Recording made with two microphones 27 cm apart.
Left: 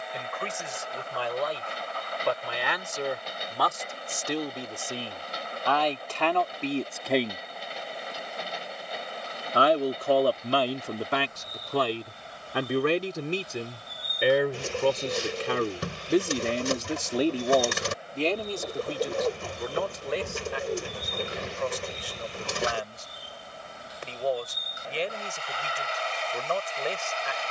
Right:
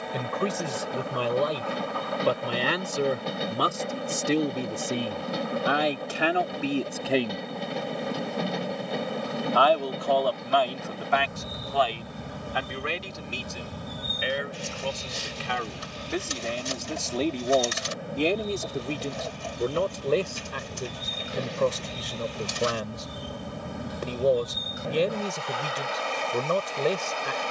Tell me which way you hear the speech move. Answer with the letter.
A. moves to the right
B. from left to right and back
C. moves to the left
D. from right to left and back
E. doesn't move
D.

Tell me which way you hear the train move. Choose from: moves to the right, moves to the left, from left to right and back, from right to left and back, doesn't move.
doesn't move.